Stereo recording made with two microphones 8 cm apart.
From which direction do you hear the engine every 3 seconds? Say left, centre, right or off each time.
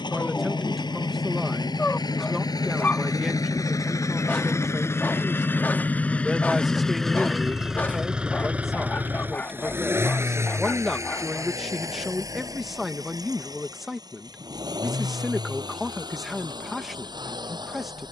left, left, centre, right, right, right.